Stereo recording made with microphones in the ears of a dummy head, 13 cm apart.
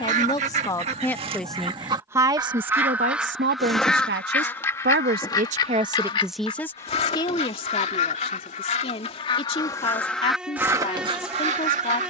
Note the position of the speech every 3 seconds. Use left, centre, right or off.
centre, right, left, left.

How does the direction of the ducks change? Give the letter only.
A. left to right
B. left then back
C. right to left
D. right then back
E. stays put
B.